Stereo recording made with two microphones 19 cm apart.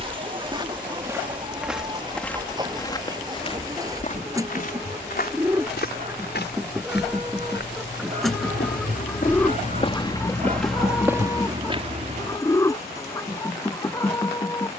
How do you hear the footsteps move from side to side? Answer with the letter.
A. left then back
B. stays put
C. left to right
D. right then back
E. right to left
A.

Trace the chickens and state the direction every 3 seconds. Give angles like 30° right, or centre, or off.
20° right, 20° right, centre, 10° left, 20° left.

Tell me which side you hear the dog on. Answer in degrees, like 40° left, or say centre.
40° right.